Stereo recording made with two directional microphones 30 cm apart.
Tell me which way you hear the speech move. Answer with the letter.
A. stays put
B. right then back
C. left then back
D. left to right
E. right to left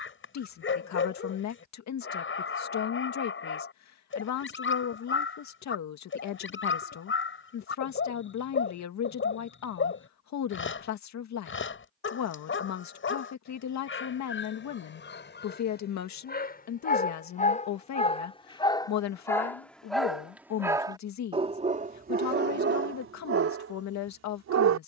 A.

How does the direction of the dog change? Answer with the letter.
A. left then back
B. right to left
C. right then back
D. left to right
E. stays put
D.